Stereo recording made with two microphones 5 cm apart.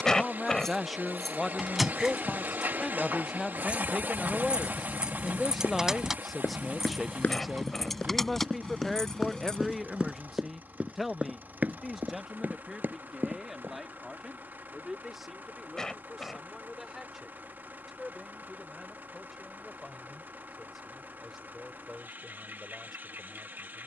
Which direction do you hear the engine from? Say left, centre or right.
right.